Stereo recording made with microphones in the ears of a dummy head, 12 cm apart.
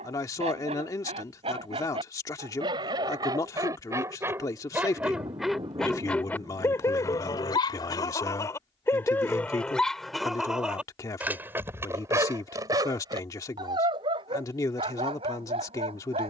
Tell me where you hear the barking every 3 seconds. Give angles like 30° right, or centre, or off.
40° right, 20° right, 20° left, centre, 30° right, 40° right.